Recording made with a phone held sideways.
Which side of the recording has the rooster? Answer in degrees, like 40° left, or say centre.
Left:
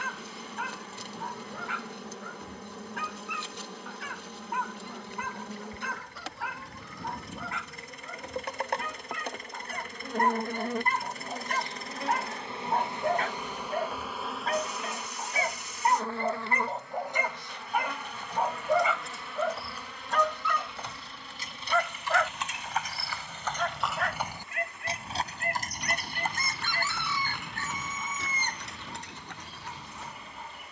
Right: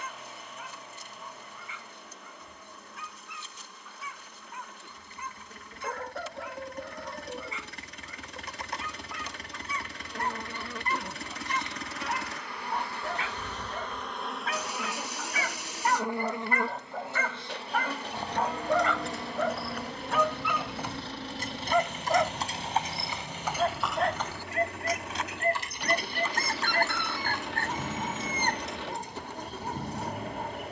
50° right.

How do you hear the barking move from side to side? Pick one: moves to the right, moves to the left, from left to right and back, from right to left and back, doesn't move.
moves to the right.